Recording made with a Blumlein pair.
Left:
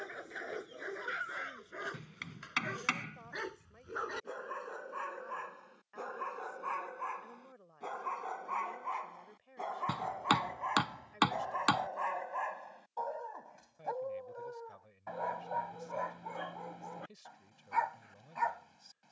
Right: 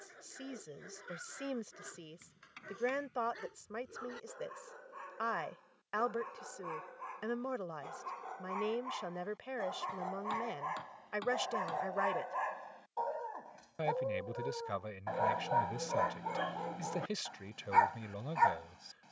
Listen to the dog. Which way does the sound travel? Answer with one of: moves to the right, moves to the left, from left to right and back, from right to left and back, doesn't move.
moves to the right.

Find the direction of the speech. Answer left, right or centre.
right.